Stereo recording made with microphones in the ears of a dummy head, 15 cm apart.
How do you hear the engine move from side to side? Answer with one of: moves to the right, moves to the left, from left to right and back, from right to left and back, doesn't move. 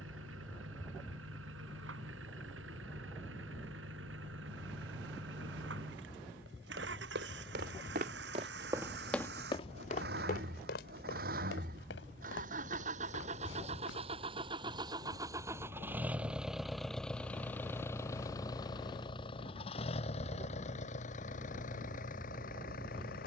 moves to the left.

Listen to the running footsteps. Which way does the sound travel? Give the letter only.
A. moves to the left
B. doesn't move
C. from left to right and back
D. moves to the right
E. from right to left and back
A.